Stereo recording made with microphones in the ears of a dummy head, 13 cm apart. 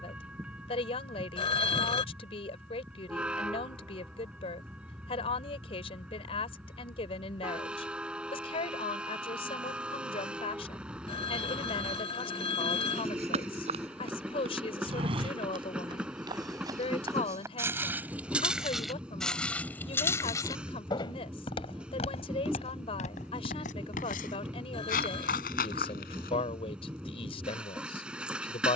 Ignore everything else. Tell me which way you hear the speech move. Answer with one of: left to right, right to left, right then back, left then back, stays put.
stays put.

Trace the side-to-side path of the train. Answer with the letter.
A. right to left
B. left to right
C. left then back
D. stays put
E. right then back
D.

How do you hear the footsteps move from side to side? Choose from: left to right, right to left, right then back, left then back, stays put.
right to left.